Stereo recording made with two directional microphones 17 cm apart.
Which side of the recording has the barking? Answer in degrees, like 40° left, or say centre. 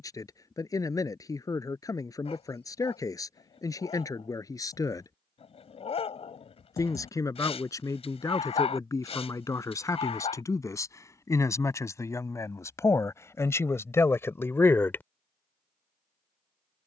40° left.